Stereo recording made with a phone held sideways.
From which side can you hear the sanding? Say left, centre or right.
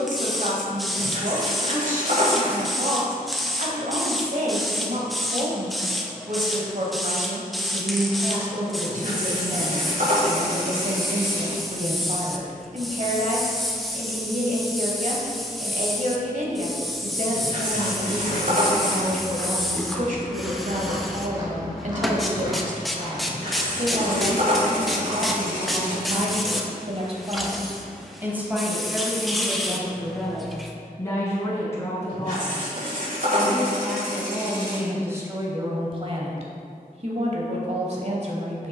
right.